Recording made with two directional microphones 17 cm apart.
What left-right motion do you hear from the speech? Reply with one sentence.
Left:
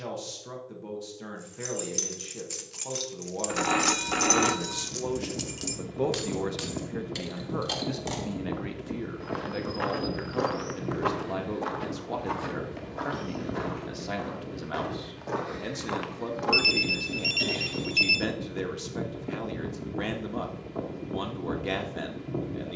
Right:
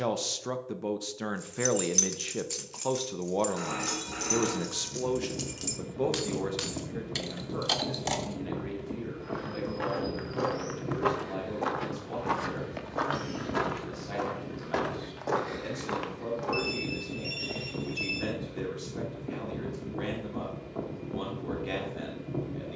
You can hear the speech move to the left.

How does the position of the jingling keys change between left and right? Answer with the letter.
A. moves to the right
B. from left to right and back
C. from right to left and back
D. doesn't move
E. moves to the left
C.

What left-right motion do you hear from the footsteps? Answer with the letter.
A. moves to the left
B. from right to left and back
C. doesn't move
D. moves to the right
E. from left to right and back
E.